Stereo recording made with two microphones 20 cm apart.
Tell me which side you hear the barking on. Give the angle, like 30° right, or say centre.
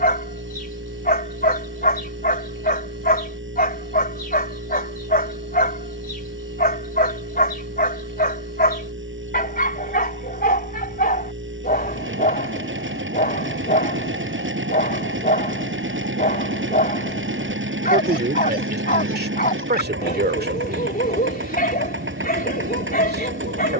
50° left.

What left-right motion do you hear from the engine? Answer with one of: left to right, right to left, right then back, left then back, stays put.
stays put.